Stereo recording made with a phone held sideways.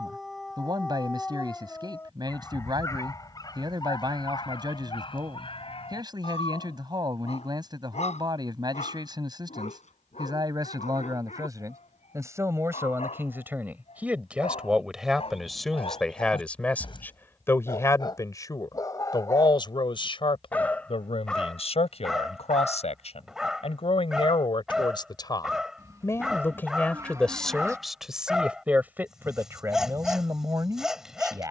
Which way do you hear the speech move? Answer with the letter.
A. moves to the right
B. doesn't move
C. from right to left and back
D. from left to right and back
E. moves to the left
C.